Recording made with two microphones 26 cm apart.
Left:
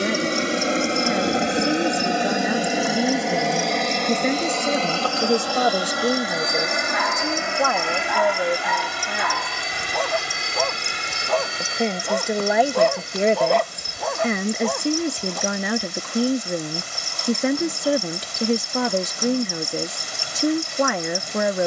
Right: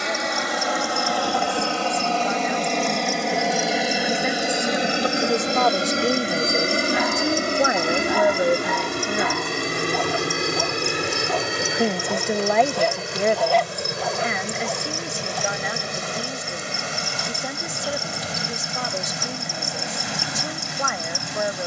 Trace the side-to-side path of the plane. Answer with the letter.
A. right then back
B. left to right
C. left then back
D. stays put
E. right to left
B.